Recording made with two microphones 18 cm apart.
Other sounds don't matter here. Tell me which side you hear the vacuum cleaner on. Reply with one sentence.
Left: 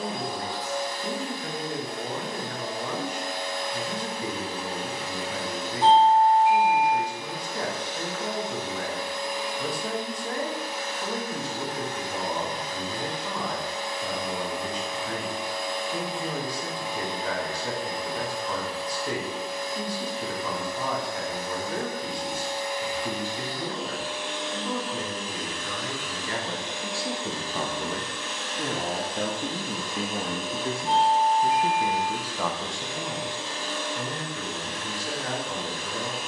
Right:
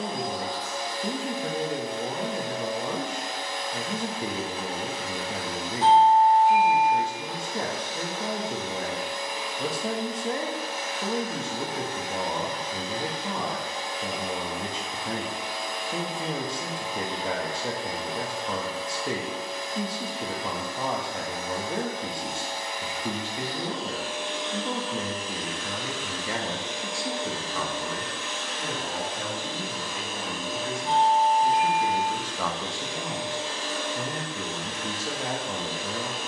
You can hear the vacuum cleaner on the right.